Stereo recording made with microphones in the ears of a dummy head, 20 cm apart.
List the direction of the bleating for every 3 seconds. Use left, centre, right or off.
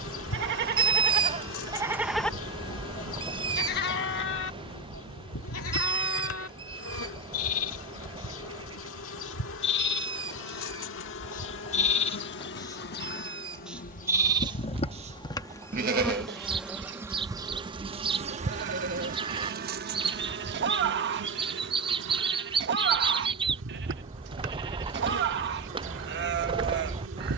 right, left, left, left, centre, right, right, right, right.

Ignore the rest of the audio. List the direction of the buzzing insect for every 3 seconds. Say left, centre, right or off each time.
left, left, left, left, left, centre, right, right, right.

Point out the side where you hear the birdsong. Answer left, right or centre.
right.